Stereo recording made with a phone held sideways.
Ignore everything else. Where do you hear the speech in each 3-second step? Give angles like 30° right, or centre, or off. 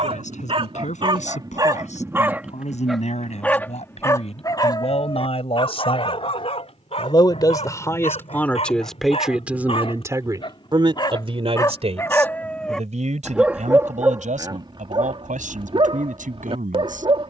60° left, 50° left, 20° left, 30° right, 60° right, 80° right.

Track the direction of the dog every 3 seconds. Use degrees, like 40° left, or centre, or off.
30° right, 30° left, 50° left, 40° left, 10° right, 40° right.